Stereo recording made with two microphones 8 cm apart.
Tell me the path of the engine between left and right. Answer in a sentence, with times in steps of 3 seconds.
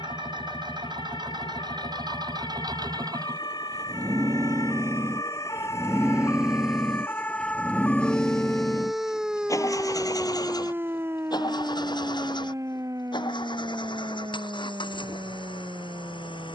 You can hear the engine on the right from 0 s, in the centre from 6 s and on the left from 9 s.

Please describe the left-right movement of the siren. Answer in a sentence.
You can hear the siren go from the left side to the right.